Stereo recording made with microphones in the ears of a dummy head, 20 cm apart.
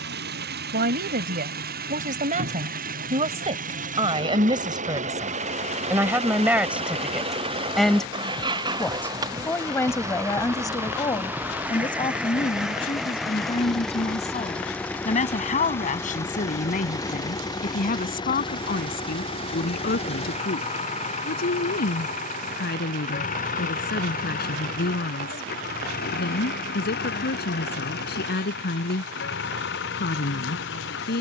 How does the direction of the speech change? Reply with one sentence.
In this clip you hear the speech travel towards the left.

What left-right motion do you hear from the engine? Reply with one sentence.
In this clip you hear the engine go from the right side to the left.